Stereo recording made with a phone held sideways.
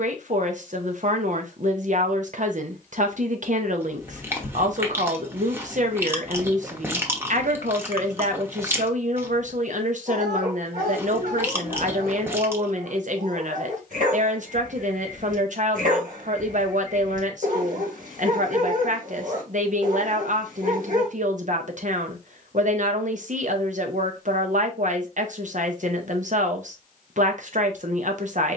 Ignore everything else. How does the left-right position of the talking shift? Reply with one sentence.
You can hear the talking stay in one place.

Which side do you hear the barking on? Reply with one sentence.
You can hear the barking on the right.